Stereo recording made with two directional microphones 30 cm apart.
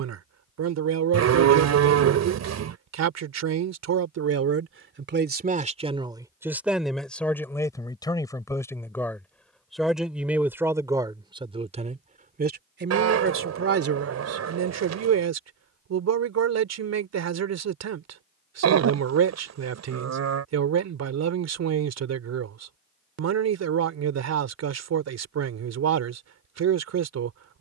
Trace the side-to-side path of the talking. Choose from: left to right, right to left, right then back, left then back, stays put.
left then back.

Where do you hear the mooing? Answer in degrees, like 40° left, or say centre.
60° right.